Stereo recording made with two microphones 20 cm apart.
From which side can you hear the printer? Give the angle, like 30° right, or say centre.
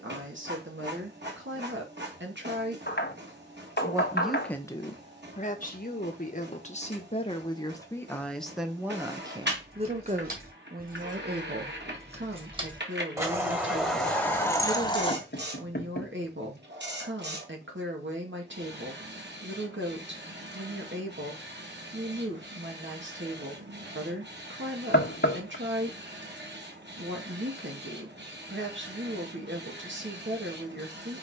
60° right.